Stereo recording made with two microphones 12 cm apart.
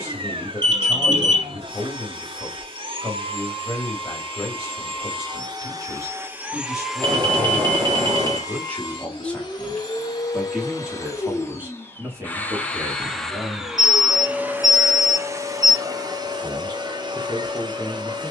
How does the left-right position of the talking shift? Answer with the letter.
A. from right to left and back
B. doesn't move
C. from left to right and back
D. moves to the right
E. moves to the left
D.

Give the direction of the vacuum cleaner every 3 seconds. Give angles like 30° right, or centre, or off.
50° right, 40° right, 10° left, 30° left, centre, 40° right.